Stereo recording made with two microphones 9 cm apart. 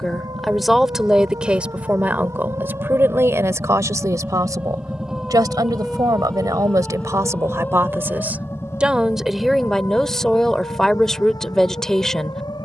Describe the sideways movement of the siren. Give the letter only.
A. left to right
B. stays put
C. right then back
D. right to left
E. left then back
D.